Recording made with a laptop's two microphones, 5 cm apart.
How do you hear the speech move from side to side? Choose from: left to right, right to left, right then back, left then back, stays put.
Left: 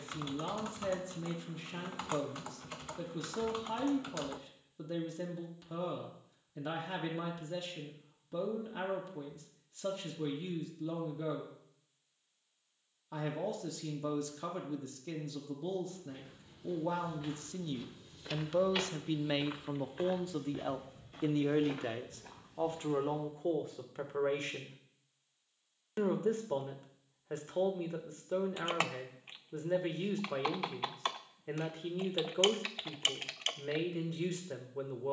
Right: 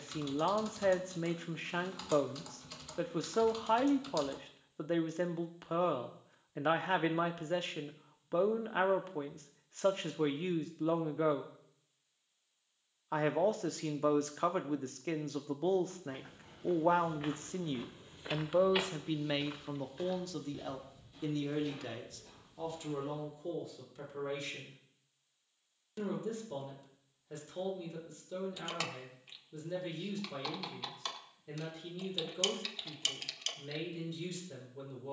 right to left.